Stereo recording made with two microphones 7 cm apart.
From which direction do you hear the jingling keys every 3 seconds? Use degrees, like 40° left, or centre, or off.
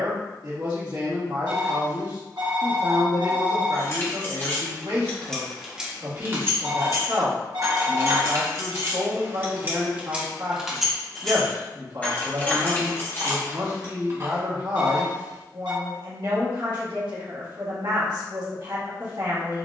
off, 30° left, 50° right, 10° right, 30° left, off, off.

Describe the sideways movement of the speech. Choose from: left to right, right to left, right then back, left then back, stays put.
stays put.